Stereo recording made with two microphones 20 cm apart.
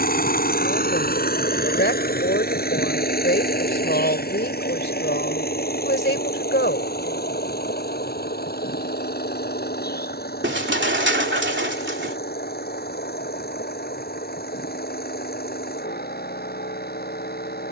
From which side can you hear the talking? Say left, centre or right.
left.